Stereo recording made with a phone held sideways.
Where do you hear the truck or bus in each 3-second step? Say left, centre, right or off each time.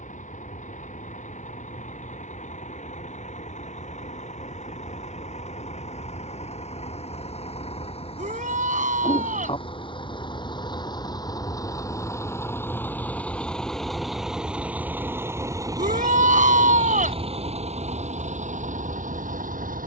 left, left, left, left, centre, right, right.